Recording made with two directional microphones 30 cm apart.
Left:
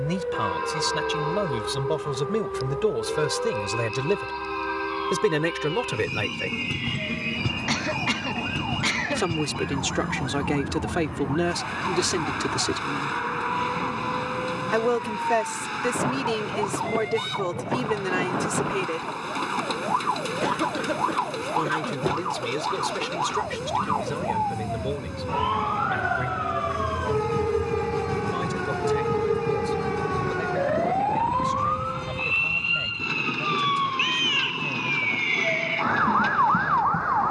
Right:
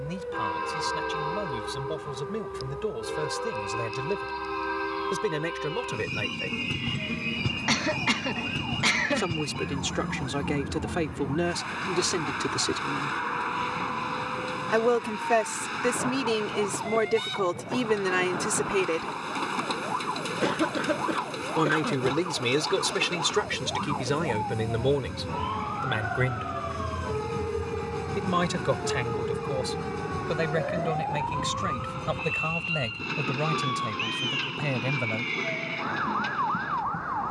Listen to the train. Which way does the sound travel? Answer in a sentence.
In this clip you hear the train stay in one place.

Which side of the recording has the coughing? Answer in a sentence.
In this clip you hear the coughing in the centre.